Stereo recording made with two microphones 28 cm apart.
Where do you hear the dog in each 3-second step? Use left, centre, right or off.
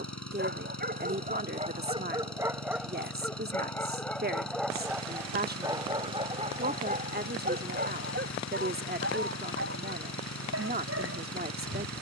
right, centre, right, right.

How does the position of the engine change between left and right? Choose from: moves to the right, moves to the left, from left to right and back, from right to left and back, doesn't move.
doesn't move.